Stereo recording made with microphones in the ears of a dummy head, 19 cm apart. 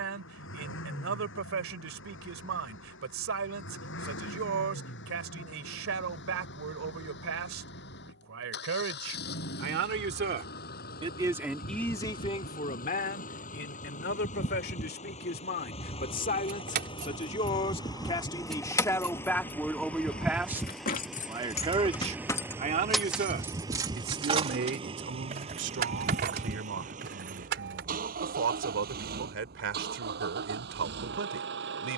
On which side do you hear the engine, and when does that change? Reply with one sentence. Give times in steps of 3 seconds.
You can hear the engine on the left from 0 s, in the centre from 18 s and on the right from 24 s.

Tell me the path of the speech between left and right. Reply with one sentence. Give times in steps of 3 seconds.
You can hear the speech on the right from 0 s, on the left from 12 s, in the centre from 18 s and on the right from 21 s.